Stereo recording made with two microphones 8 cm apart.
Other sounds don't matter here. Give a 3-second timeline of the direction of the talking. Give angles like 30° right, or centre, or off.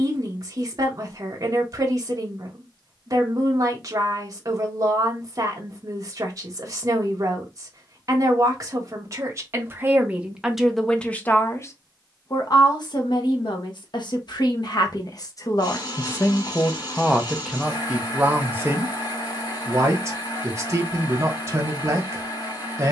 40° right, 40° right, 40° right, 10° right, 60° left, 20° left, 30° right, 40° right.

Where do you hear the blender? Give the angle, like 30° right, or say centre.
50° left.